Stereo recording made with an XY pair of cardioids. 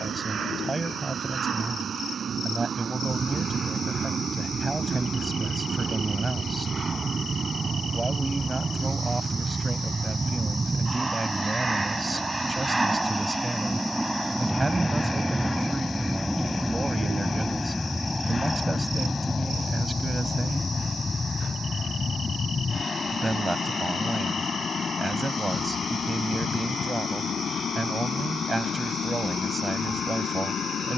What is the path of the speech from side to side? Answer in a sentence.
In this clip you hear the speech stay put.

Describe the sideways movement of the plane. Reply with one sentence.
You can hear the plane move from right to left.